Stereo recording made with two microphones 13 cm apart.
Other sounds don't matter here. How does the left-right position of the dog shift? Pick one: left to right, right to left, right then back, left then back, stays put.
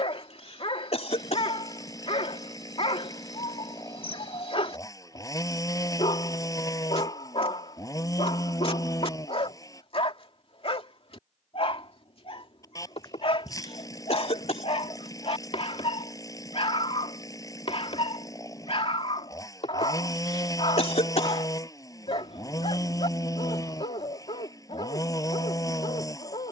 stays put.